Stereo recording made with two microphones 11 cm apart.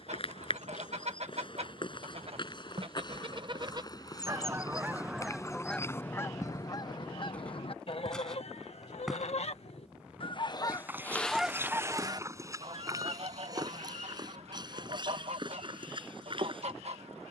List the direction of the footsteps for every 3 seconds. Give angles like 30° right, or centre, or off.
50° left, 30° left, 10° left, 10° right, 30° right, 40° right.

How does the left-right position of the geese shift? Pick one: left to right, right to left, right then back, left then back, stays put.
left then back.